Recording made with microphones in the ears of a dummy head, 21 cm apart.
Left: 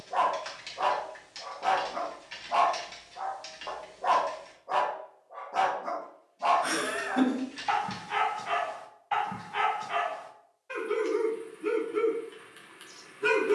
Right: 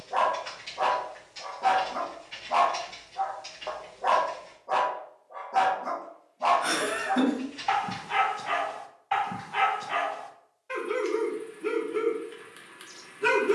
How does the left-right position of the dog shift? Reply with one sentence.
In this clip you hear the dog stay in one place.